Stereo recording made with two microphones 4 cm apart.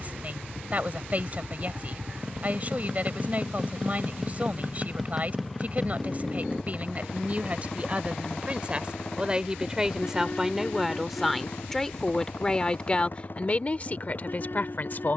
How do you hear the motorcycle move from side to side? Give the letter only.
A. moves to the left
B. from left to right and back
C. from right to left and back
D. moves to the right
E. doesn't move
A.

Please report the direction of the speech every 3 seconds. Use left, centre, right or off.
right, right, right, centre, left.